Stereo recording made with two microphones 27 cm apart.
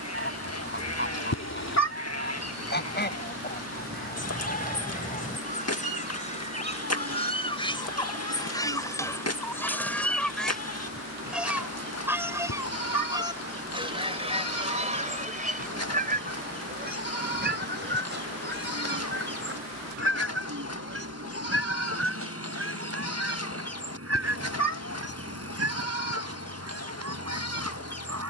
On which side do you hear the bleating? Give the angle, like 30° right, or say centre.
60° left.